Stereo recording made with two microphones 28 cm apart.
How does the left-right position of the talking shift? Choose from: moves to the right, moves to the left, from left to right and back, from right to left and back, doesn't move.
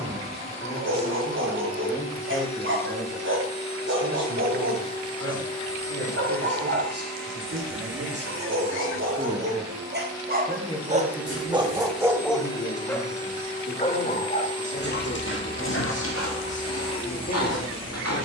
from left to right and back.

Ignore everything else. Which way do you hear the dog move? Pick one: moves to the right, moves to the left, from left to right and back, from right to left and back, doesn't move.
moves to the left.